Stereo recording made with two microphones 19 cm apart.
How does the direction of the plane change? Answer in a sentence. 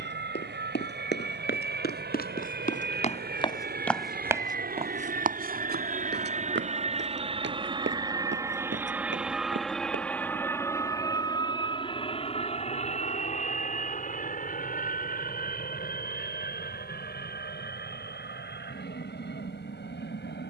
You can hear the plane move from right to left.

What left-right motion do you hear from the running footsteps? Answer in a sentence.
You can hear the running footsteps travel towards the right.